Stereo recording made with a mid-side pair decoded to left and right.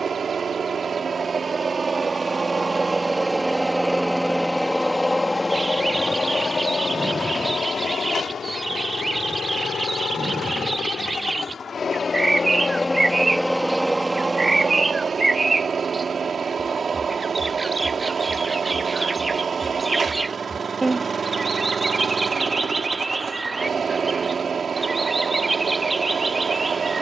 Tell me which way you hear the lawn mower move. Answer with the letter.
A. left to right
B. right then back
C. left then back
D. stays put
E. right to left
C.